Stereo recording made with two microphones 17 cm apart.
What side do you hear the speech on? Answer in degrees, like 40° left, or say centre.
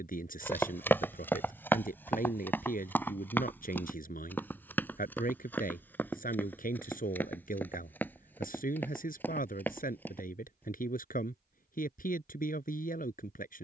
50° left.